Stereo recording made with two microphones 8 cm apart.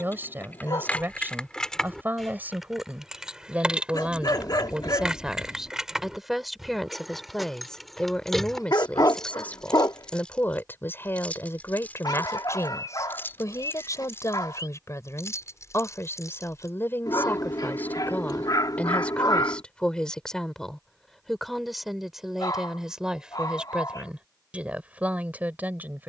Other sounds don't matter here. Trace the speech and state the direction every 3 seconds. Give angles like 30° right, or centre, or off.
30° right, 10° right, 10° left, 30° left, 40° left, 30° left, 10° left, 10° right, 20° right.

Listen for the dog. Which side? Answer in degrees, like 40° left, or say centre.
60° left.